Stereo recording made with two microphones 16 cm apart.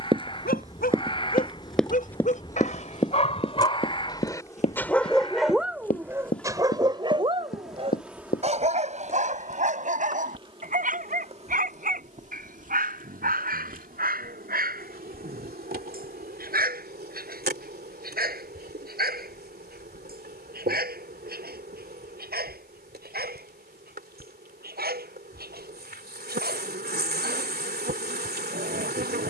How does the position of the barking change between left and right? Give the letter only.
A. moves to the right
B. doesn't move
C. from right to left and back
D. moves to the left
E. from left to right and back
A.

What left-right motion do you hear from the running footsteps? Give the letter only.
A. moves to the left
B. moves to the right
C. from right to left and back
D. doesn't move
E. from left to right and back
A.